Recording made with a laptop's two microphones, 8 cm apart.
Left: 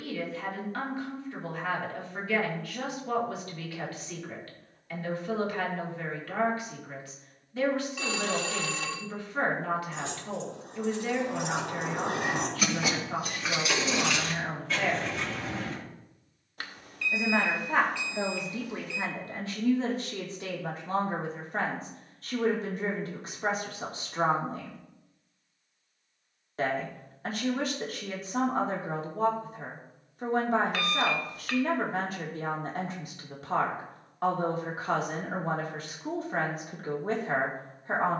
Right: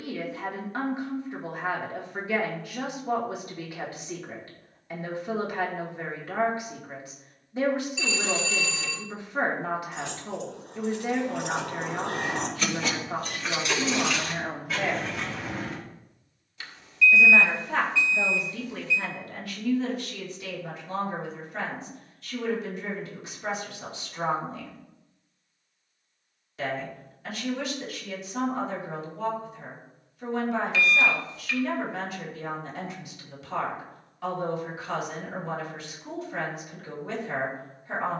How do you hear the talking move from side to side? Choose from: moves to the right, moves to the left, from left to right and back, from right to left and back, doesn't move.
moves to the left.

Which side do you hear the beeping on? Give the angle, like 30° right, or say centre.
50° left.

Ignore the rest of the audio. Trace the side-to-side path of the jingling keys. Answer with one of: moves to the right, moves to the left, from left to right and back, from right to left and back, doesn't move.
moves to the right.